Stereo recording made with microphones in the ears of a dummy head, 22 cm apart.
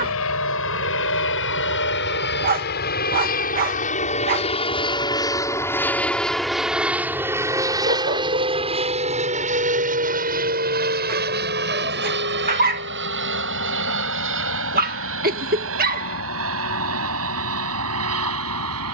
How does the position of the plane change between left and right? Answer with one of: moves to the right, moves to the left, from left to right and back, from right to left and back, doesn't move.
moves to the right.